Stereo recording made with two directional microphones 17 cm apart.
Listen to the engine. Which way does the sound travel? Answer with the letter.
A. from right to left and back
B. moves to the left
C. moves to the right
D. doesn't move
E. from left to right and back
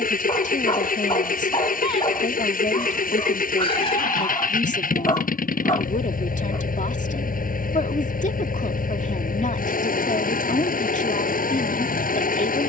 D.